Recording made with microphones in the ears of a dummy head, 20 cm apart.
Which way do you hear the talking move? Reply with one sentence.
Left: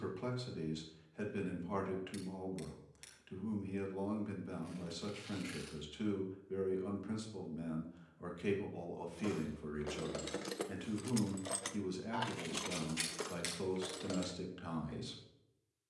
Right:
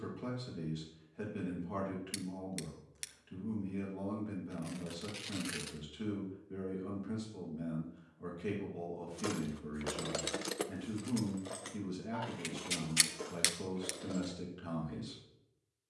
You can hear the talking stay put.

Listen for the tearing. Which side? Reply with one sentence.
In this clip you hear the tearing on the right.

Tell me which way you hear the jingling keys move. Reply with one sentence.
In this clip you hear the jingling keys travel towards the left.